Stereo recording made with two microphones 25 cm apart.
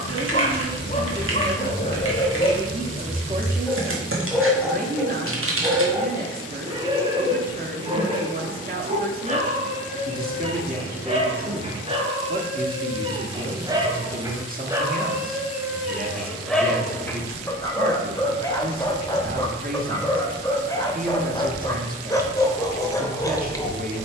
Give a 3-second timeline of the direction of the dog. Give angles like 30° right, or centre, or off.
30° left, centre, 20° right, 20° right, 20° right, centre, 10° left, 10° left.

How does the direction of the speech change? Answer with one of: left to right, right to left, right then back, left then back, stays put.
stays put.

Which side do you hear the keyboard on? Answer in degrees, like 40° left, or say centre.
60° right.